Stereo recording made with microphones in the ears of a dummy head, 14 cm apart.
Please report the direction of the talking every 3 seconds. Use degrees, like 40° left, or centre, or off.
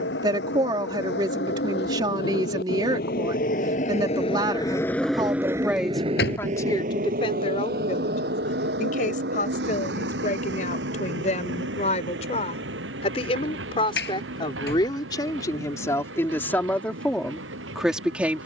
30° right, 20° right, 30° left, 50° left, 30° left, 10° left.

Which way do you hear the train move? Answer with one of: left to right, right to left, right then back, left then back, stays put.
left to right.